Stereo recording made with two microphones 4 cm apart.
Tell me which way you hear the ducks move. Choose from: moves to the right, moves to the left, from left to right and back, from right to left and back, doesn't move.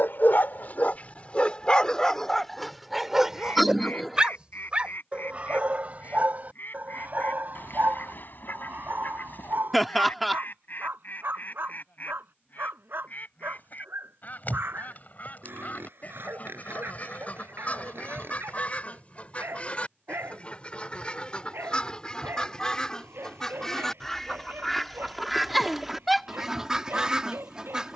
moves to the right.